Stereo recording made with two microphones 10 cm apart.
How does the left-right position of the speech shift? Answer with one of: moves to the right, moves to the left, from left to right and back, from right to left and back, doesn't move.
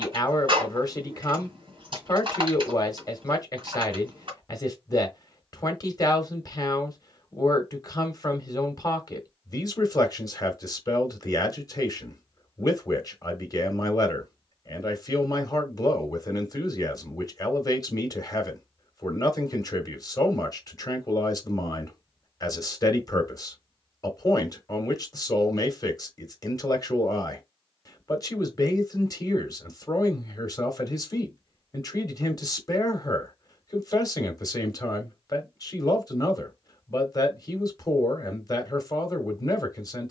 doesn't move.